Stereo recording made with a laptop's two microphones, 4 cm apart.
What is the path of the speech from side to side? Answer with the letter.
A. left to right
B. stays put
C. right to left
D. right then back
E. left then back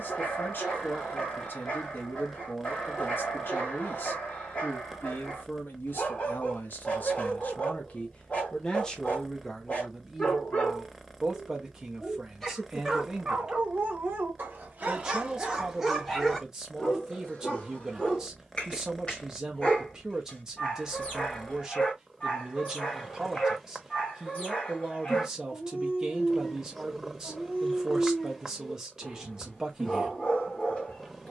A.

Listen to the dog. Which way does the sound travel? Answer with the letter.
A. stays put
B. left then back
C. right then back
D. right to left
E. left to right
C.